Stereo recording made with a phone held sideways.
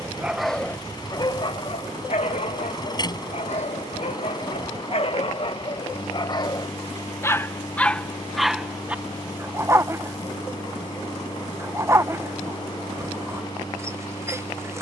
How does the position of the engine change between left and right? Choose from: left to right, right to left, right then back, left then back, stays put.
stays put.